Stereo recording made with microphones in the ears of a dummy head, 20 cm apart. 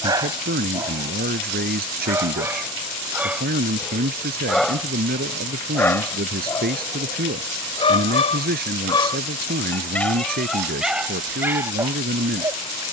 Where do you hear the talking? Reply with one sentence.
In this clip you hear the talking on the right.